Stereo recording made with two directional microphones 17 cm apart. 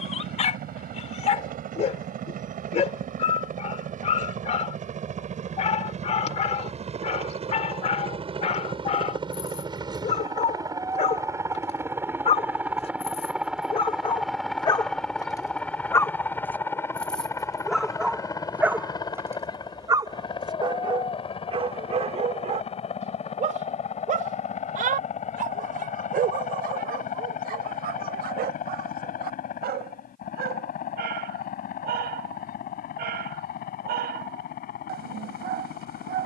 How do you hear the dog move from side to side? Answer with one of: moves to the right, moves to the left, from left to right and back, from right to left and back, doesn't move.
moves to the right.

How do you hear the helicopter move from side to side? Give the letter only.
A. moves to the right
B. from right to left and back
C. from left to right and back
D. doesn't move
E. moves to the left
E.